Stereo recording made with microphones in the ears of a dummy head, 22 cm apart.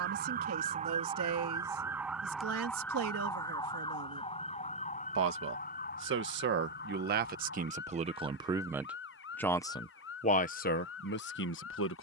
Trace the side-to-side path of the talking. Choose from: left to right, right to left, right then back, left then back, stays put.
right to left.